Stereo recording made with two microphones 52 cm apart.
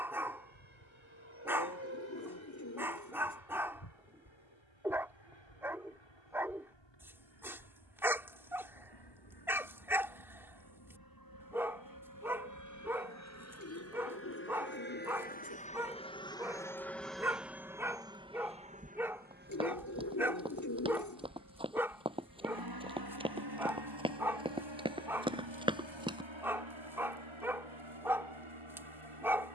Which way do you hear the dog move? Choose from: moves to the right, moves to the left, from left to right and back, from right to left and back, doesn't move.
doesn't move.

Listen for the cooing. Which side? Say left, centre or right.
left.